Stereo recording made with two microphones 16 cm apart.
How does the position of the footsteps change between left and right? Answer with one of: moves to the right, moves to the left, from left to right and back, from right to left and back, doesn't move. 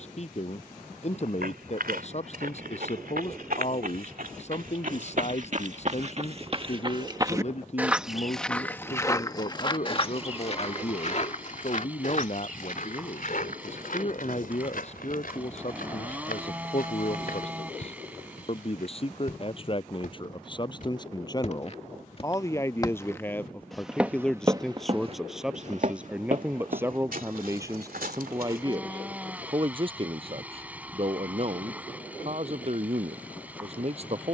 from right to left and back.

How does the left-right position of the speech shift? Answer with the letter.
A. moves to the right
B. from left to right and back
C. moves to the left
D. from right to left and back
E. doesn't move
A.